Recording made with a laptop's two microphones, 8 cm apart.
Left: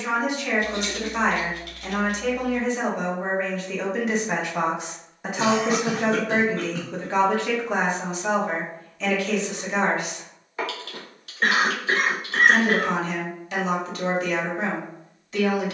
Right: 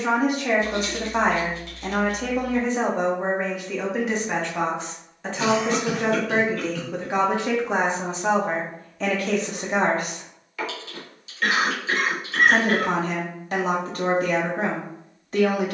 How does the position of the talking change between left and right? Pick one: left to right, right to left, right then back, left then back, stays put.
left then back.